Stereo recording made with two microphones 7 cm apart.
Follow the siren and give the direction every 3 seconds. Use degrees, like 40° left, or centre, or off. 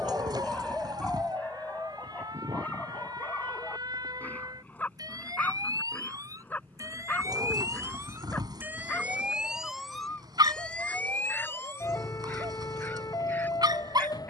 70° right, 60° right, 40° right, 10° left, 50° left.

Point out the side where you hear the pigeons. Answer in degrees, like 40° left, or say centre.
70° right.